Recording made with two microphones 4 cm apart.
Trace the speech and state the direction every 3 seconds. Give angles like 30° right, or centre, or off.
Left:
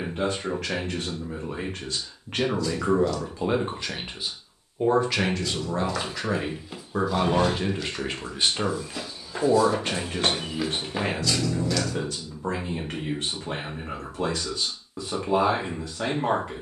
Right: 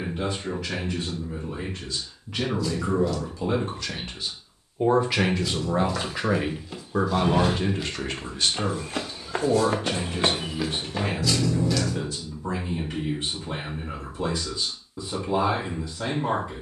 60° left, 10° left, centre, 50° left, 70° left, 70° left.